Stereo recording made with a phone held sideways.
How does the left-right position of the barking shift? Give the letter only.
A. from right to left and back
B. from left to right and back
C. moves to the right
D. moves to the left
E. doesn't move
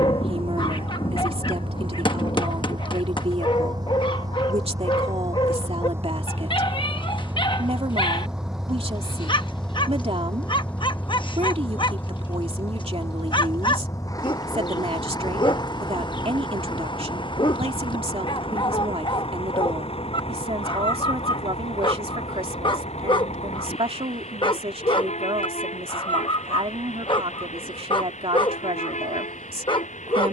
E.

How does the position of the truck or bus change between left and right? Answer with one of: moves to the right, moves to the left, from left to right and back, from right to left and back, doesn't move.
moves to the left.